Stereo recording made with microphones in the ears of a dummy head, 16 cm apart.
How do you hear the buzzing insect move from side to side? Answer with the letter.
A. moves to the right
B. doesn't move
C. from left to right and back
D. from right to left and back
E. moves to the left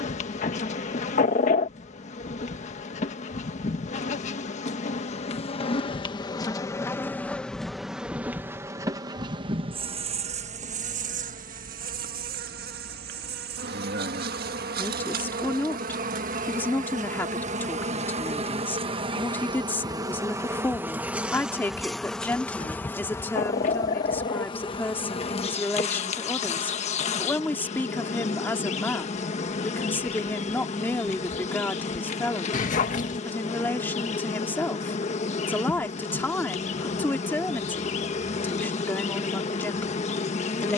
C.